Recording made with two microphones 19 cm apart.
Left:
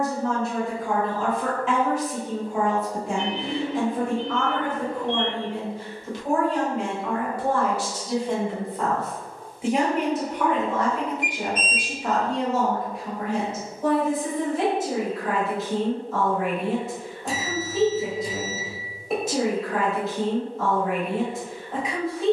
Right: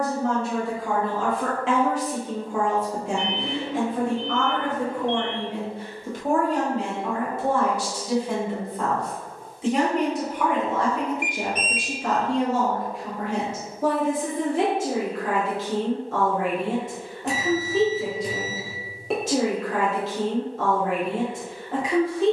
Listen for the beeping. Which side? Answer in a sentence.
You can hear the beeping on the right.